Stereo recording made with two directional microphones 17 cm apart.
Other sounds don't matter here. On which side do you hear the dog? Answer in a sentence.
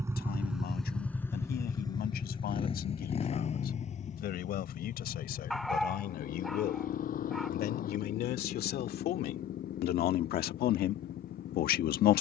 You can hear the dog in the centre.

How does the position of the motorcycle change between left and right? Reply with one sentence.
You can hear the motorcycle go from the right side to the left.